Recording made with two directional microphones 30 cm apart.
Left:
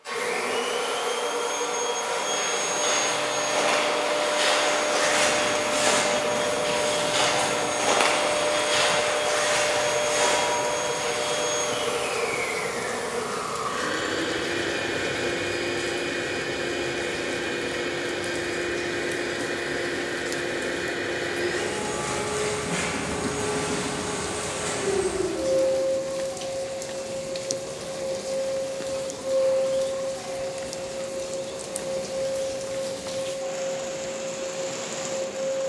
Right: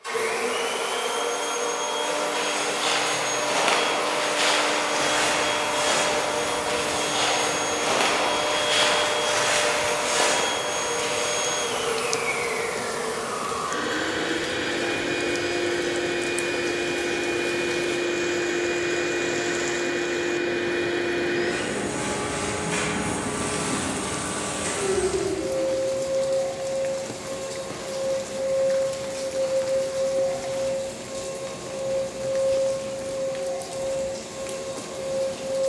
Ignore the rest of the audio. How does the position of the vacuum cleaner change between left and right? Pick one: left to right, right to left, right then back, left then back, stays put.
stays put.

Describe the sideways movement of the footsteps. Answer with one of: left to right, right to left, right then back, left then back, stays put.
left then back.